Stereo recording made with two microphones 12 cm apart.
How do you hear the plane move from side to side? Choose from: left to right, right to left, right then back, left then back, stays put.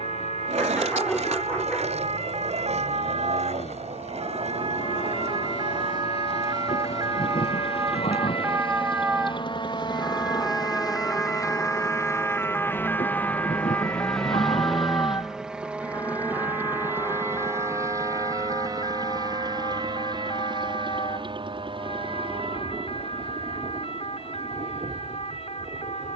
left to right.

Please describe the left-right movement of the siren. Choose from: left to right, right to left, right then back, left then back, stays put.
right to left.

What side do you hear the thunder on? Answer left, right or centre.
left.